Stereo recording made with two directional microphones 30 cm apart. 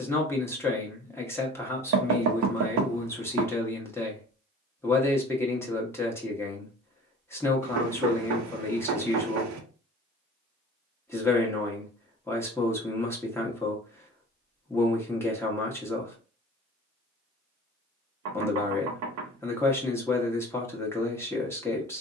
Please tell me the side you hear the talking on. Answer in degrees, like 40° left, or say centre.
10° left.